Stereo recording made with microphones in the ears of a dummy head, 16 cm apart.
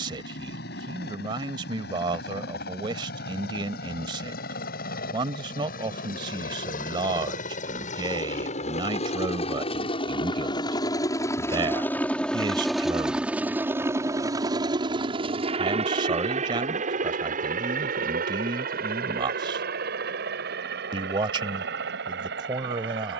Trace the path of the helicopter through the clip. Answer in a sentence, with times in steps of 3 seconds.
You can hear the helicopter on the left from 0 s, in the centre from 12 s and on the right from 15 s.